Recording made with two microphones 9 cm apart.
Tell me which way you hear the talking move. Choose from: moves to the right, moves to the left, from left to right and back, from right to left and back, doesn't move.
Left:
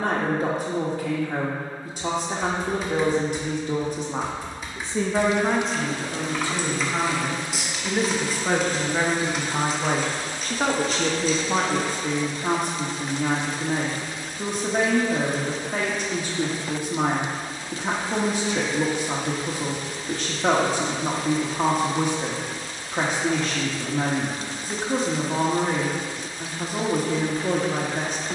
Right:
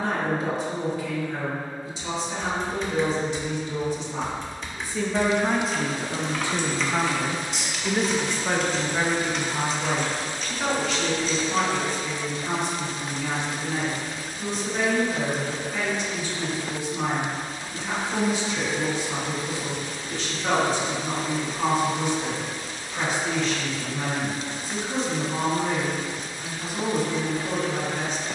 from left to right and back.